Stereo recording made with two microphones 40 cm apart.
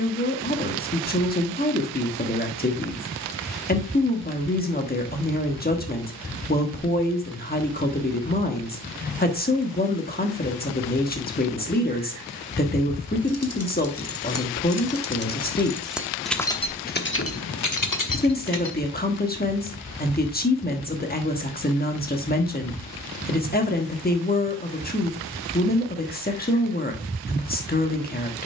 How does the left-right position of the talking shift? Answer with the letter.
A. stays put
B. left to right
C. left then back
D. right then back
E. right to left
A.